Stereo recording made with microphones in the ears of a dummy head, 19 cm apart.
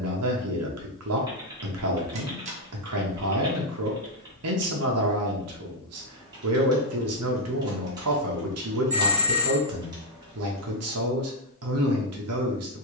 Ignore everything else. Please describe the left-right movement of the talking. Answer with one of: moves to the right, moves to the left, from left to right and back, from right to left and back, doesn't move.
doesn't move.